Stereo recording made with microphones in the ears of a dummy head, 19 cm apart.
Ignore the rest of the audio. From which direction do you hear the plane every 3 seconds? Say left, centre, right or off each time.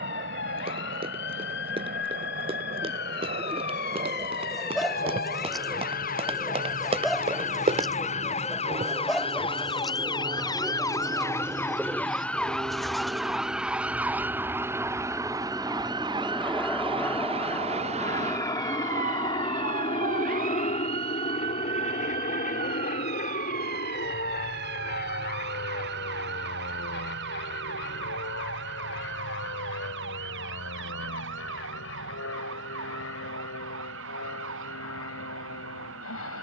right, right, right, right, centre, centre, left, left, left, left, left, left.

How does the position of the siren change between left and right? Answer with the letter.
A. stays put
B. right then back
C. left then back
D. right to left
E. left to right
E.